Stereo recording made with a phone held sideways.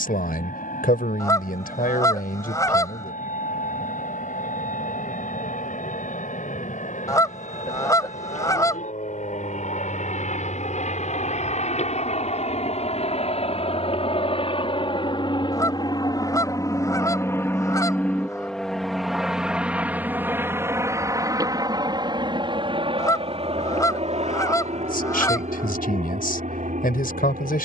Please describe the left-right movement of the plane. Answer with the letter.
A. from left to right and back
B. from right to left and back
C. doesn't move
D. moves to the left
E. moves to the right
E.